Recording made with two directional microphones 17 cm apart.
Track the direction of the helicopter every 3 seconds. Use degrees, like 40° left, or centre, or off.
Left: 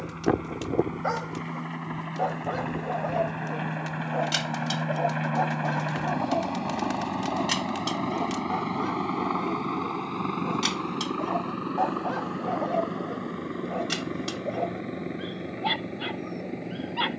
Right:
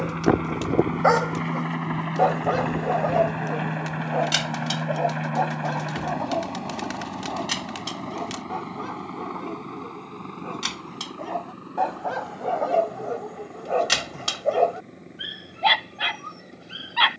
40° right, 10° right, 30° left, 50° left, 60° left, 70° left.